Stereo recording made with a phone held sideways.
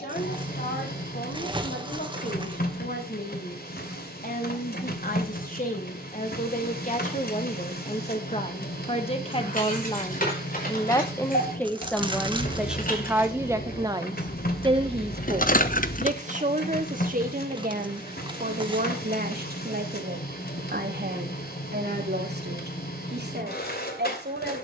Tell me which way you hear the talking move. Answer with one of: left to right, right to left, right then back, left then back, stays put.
left to right.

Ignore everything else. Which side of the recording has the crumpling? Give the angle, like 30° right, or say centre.
30° right.